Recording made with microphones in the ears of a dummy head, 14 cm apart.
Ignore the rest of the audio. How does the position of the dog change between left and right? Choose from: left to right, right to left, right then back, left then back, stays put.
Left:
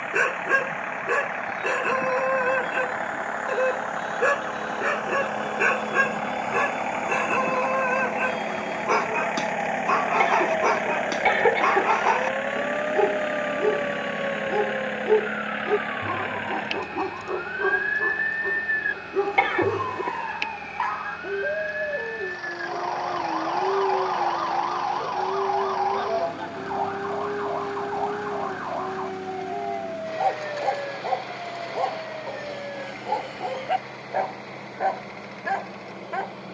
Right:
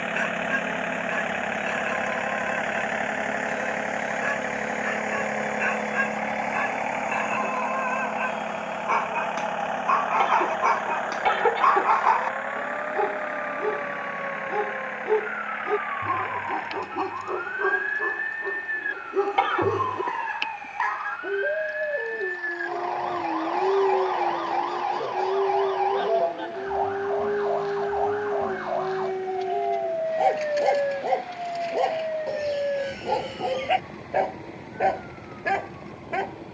left to right.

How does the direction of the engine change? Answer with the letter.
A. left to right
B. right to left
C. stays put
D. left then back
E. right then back
B.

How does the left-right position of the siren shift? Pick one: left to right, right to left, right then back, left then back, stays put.
left to right.